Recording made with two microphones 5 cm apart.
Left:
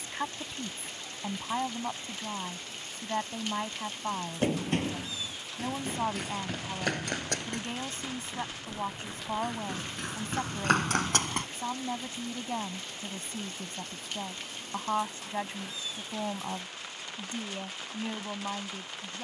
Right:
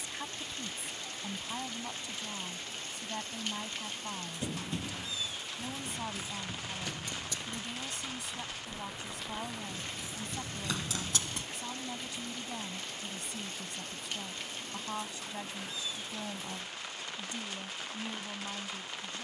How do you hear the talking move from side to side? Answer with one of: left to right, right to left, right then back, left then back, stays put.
stays put.